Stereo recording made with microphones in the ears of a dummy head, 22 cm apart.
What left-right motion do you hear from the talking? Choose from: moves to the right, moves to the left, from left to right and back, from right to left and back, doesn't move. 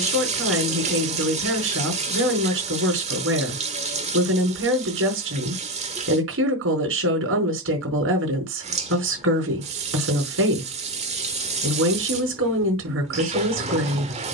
doesn't move.